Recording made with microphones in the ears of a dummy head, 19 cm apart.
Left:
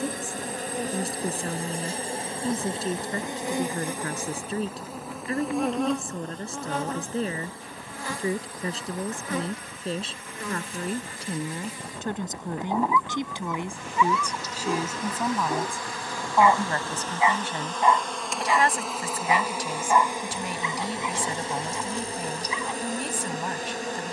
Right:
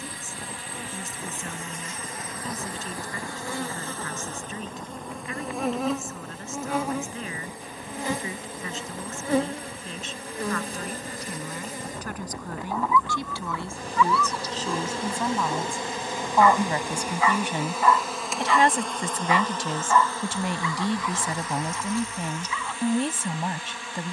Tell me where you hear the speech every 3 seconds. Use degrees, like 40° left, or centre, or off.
30° left, 30° left, 30° left, 30° left, 20° left, 10° right, 20° right, 20° right.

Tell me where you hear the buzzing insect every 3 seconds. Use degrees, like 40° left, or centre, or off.
30° left, 10° left, 10° right, 30° right, 30° right, 20° right, 10° left, 30° left.